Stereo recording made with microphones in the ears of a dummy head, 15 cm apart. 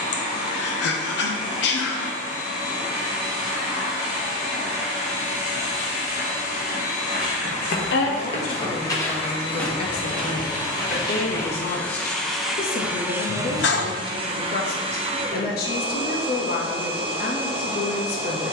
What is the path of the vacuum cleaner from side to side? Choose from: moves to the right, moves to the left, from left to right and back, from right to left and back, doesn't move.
moves to the right.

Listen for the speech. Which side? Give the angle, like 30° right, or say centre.
60° left.